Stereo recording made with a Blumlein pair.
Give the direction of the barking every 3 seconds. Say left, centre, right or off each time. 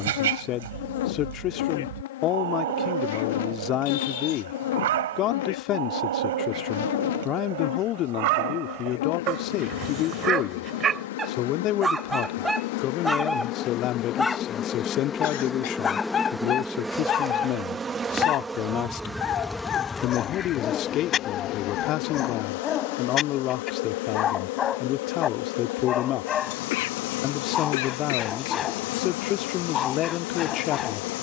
right, right, right, right, centre, left, left, left, left, left, left.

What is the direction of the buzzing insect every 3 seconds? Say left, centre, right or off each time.
left, left, left, left, left, centre, centre, left, left, left, left.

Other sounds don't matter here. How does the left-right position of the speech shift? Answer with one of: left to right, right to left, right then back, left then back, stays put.
stays put.